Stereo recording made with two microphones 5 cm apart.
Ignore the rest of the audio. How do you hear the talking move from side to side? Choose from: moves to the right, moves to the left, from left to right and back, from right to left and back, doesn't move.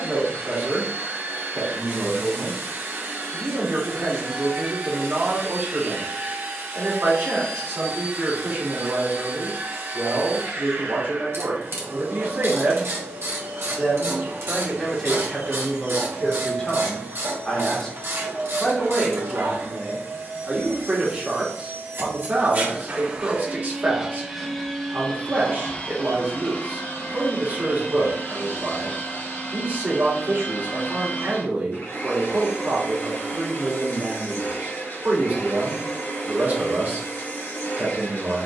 from right to left and back.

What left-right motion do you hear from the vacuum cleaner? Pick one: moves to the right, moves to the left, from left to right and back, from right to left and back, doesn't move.
moves to the left.